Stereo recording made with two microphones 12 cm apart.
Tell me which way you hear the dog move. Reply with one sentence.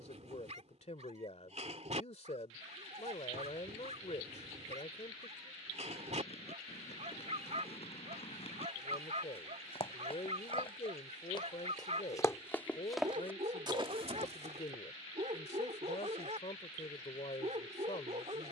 In this clip you hear the dog stay in one place.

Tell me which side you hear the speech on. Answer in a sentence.
In this clip you hear the speech on the left.